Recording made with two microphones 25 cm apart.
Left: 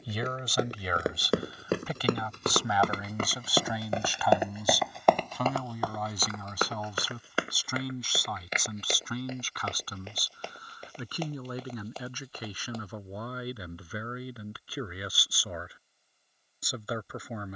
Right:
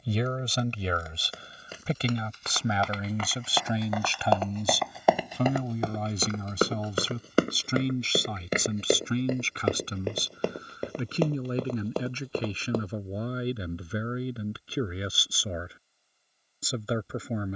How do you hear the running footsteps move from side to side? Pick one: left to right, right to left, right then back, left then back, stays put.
left to right.